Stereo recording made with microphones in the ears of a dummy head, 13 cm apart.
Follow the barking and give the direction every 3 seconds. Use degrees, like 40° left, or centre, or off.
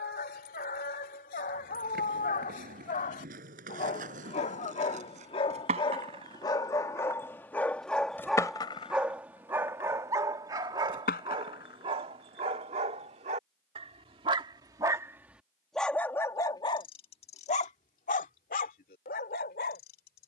60° left, 50° left, 10° left, 20° right, 40° right, 20° left, 70° left.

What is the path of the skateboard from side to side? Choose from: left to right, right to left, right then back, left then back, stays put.
right to left.